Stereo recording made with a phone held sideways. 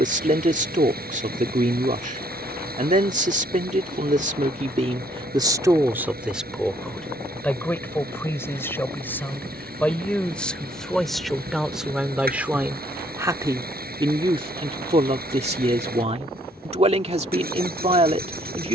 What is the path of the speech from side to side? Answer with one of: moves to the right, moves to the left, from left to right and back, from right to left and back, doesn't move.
from right to left and back.